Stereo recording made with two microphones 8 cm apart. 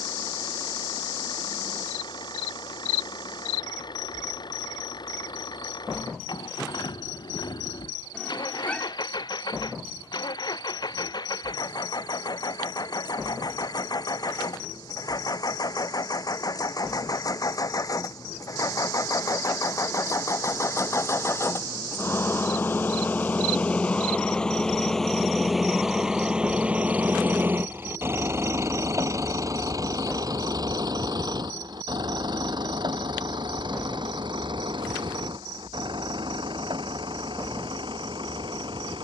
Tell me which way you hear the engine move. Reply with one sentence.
You can hear the engine move to the right.